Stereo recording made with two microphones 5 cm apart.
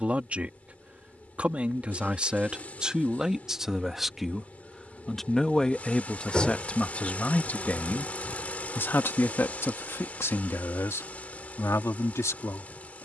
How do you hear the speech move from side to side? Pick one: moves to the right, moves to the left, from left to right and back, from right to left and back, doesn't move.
moves to the left.